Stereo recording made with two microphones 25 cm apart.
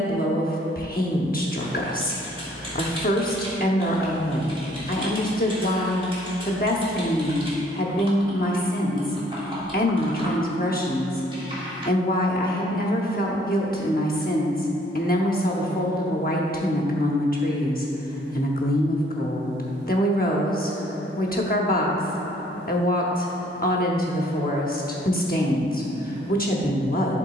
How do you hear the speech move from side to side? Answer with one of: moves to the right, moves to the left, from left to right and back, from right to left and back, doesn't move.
doesn't move.